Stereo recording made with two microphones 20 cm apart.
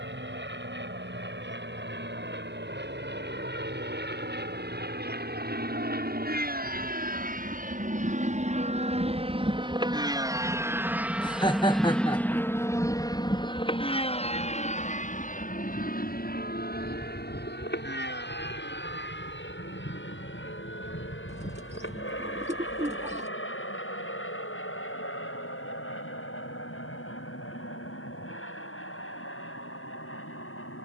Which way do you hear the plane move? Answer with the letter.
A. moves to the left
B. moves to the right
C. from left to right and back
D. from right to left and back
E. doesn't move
A.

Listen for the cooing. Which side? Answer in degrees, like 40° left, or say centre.
30° right.